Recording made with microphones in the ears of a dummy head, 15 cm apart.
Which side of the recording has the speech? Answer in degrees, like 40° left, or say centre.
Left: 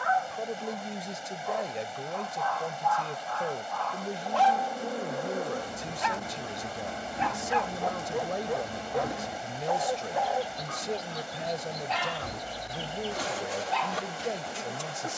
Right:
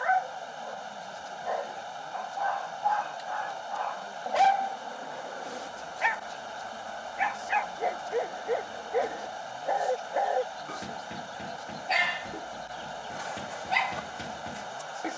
80° left.